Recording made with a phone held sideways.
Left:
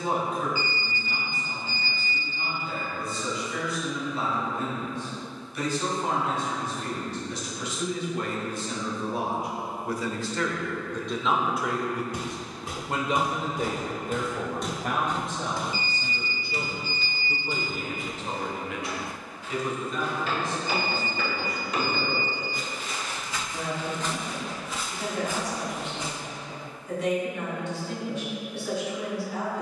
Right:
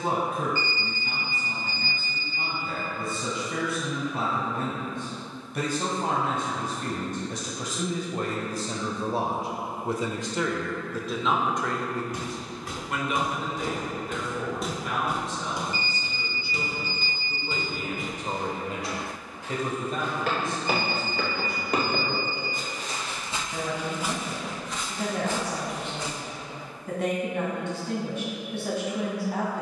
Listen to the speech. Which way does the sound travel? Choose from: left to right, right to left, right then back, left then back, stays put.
left then back.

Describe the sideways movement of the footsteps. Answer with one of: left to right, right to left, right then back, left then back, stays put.
right then back.